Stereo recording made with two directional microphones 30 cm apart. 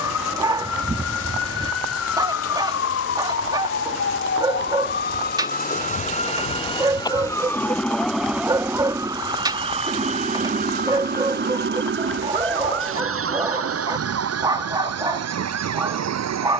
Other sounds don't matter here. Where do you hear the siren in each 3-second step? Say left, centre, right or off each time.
left, left, centre, right, right, right.